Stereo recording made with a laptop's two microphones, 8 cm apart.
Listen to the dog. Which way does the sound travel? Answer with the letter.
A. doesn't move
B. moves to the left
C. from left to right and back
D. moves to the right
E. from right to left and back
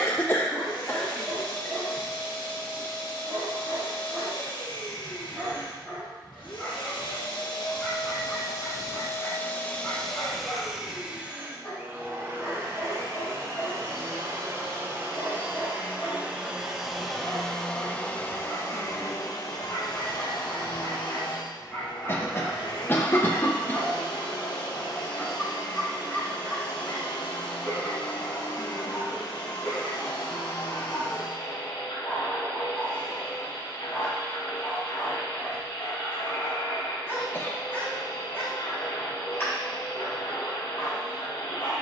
B.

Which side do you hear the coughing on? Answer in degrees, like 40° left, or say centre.
30° left.